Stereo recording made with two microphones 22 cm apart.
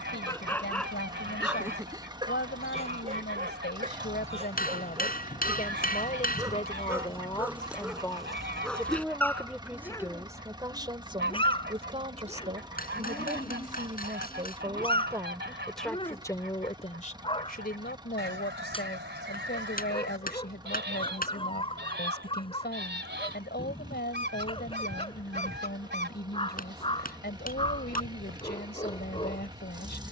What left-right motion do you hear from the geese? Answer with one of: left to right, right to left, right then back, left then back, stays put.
stays put.